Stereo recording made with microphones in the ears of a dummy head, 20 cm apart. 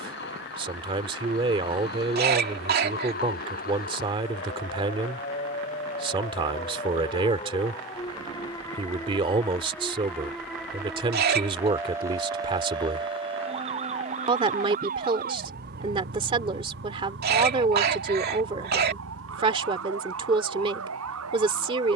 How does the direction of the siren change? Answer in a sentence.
You can hear the siren travel towards the right.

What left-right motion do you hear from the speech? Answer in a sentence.
In this clip you hear the speech stay in one place.